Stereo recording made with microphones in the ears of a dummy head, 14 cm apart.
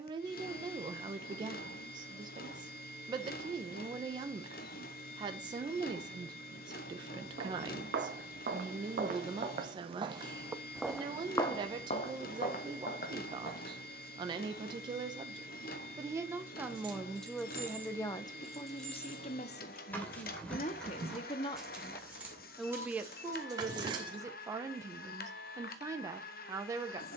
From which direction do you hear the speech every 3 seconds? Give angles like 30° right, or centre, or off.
30° right, 30° right, 30° right, 30° right, 30° right, 10° right, 40° left, centre, 20° right.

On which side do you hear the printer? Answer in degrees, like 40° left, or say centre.
70° left.